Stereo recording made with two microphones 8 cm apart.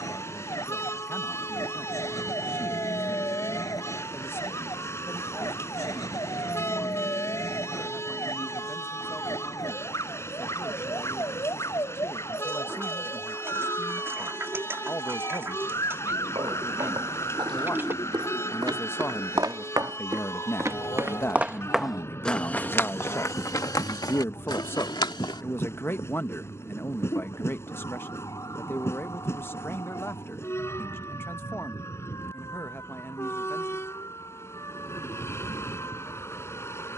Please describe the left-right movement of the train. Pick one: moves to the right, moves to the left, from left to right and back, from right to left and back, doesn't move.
doesn't move.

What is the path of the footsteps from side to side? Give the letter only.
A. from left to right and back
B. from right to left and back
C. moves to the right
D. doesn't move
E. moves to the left
E.